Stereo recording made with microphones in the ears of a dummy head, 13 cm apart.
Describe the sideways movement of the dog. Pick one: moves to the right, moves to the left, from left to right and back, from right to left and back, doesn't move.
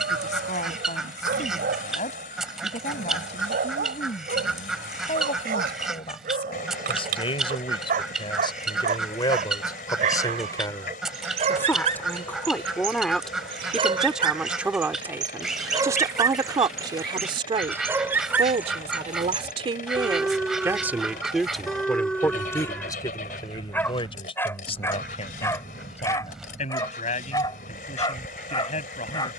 moves to the left.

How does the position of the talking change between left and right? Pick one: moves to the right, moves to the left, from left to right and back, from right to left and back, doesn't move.
from left to right and back.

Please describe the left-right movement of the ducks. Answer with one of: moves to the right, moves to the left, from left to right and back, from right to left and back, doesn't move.
doesn't move.